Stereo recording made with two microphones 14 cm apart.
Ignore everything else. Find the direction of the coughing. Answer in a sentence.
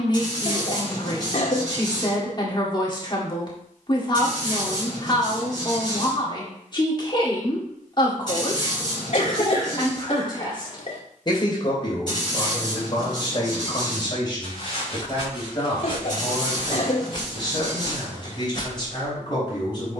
You can hear the coughing on the left.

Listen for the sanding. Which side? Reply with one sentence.
You can hear the sanding on the left.